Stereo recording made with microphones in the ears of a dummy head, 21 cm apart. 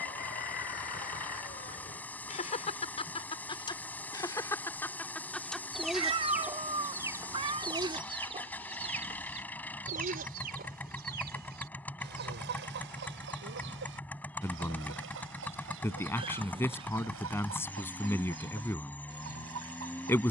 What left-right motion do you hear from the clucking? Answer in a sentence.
You can hear the clucking travel towards the right.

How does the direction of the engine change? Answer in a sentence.
You can hear the engine stay in one place.